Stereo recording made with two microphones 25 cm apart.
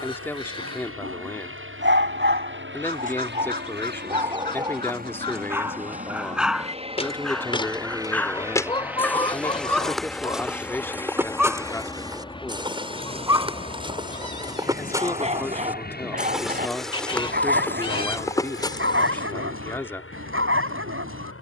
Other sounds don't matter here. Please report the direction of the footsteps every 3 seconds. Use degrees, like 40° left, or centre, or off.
off, off, 20° left, centre, 20° right, centre, 20° left.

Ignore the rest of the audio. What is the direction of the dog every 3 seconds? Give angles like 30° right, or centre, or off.
50° right, 20° right, centre, centre, 10° right, 30° right, 50° right.